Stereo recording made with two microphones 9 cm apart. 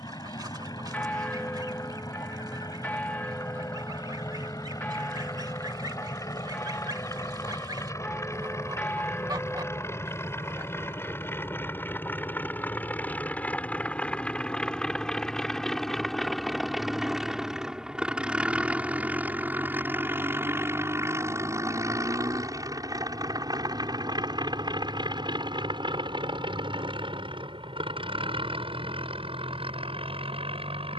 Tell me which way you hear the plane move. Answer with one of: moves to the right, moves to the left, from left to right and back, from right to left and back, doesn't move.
moves to the right.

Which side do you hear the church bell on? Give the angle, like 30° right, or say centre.
10° left.